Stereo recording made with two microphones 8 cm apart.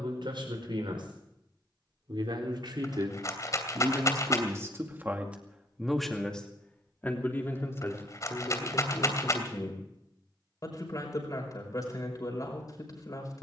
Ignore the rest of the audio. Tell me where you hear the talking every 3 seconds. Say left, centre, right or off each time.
right, right, left, left, left.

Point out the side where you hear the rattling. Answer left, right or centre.
left.